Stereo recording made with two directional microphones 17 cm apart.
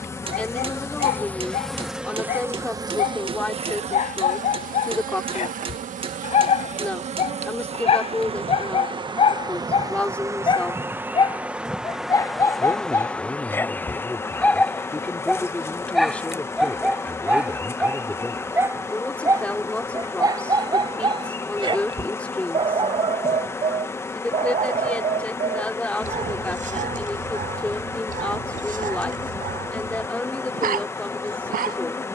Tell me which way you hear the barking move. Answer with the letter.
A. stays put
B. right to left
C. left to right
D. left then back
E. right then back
C.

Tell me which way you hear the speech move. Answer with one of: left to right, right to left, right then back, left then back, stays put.
stays put.